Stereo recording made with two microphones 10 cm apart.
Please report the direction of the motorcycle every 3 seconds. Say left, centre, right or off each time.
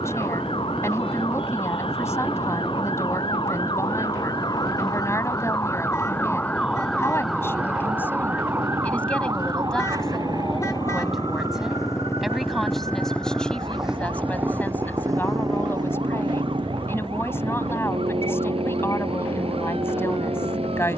left, left, left, left, centre, right, right.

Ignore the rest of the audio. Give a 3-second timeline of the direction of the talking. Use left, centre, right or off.
left, left, left, centre, centre, left, left.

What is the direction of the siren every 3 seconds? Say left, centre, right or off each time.
left, left, centre, right, right, right, right.